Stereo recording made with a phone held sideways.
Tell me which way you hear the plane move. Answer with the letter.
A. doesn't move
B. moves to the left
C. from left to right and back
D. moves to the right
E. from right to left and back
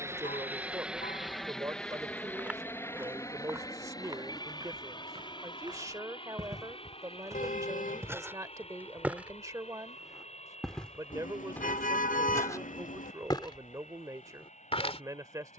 B.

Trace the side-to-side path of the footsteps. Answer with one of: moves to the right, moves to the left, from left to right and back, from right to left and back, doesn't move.
from left to right and back.